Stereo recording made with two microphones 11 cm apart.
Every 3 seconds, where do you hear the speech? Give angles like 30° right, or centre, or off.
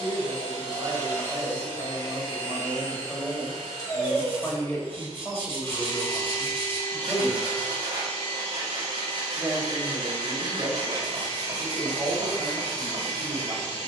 30° right, 10° left, centre, 30° right, 40° right.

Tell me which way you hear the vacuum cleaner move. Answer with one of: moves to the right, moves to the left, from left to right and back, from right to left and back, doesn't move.
doesn't move.